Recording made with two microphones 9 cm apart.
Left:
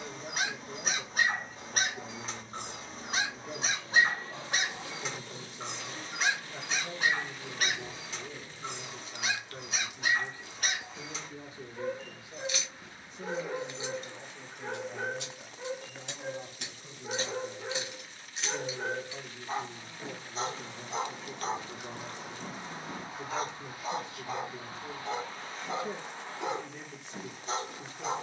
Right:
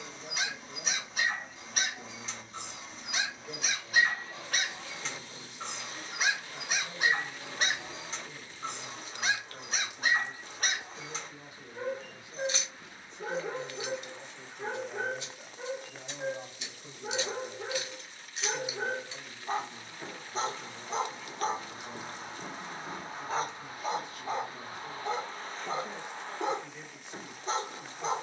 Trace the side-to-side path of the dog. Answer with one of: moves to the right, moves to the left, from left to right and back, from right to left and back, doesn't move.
moves to the right.